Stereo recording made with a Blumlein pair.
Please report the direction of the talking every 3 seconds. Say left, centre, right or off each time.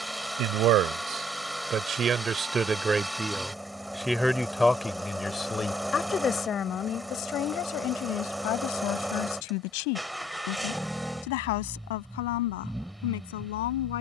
right, centre, left, left, left.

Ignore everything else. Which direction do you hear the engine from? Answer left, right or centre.
centre.